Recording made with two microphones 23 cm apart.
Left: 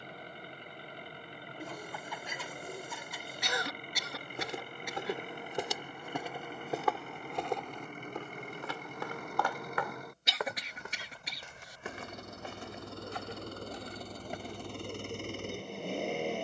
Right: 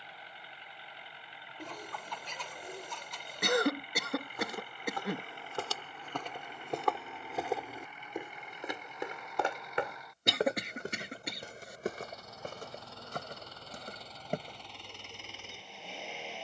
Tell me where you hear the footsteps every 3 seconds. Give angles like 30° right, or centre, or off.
off, 20° left, centre, 30° right, 50° right, off.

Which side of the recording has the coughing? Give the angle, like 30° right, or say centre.
60° right.